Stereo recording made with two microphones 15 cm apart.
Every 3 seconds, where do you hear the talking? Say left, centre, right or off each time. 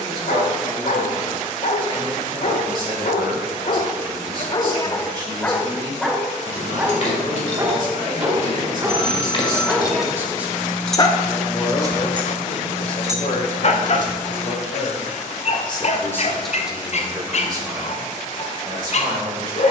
right, right, right, centre, left, centre, right.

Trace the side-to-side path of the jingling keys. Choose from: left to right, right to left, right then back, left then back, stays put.
left to right.